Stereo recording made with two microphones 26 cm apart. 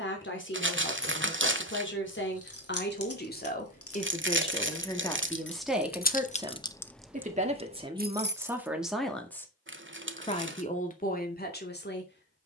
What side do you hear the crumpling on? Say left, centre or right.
right.